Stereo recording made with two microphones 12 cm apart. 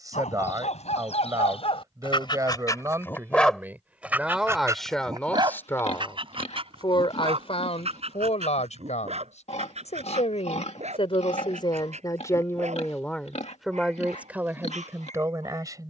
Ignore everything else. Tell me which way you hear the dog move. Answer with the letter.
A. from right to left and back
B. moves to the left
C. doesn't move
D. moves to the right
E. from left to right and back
D.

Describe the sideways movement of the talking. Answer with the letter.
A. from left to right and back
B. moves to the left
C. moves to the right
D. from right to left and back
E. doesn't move
D.